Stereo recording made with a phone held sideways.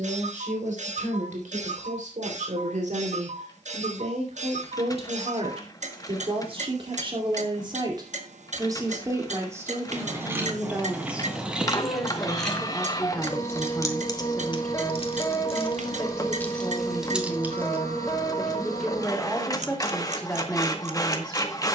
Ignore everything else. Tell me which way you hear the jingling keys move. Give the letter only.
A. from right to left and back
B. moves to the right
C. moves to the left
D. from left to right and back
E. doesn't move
A.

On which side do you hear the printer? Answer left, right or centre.
left.